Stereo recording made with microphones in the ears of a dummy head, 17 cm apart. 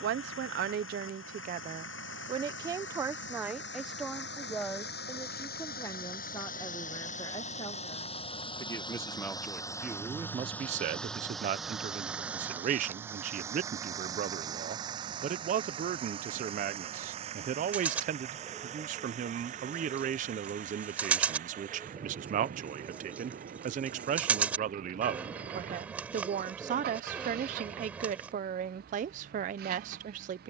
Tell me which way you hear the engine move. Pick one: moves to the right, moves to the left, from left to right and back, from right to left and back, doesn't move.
moves to the right.